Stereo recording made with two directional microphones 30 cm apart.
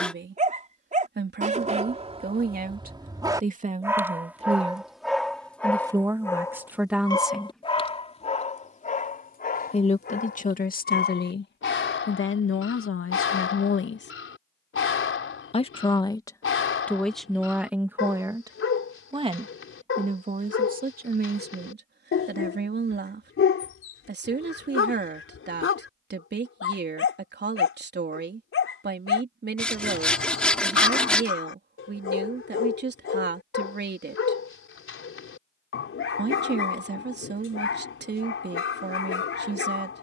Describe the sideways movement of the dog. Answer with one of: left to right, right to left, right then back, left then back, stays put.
right to left.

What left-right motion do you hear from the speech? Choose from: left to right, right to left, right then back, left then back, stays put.
left then back.